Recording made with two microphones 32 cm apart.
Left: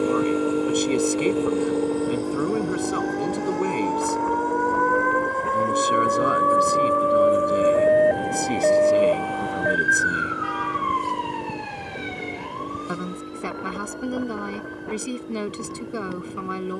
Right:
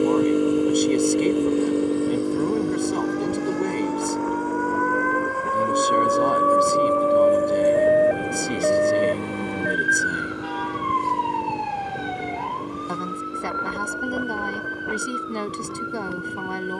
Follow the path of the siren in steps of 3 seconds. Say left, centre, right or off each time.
left, left, centre, right, right, right.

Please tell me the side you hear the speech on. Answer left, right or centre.
centre.